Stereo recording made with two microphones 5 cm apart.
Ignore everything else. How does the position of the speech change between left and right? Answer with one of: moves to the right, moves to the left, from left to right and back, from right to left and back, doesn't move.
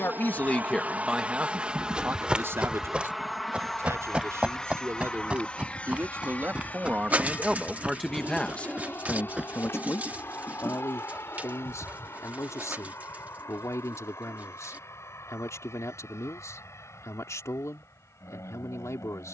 from left to right and back.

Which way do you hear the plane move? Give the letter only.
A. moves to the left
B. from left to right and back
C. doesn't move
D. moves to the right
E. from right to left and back
A.